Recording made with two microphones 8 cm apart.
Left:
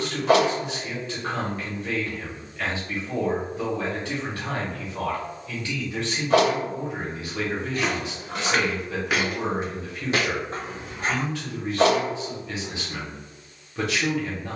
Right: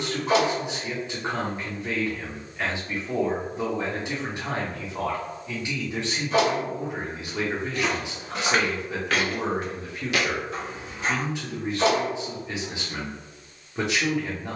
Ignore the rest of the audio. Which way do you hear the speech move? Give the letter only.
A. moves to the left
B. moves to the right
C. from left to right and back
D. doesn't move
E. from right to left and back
D.